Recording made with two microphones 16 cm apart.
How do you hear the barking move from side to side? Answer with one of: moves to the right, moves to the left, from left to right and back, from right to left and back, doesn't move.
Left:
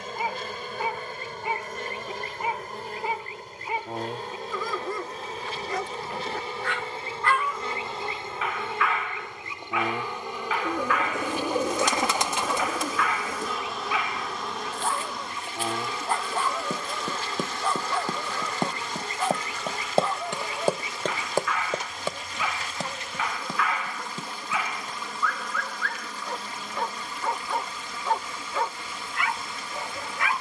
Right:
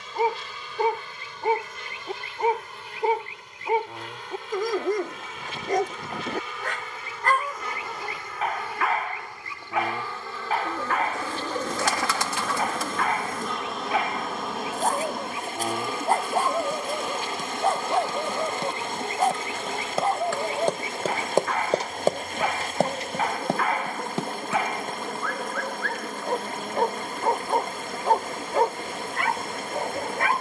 doesn't move.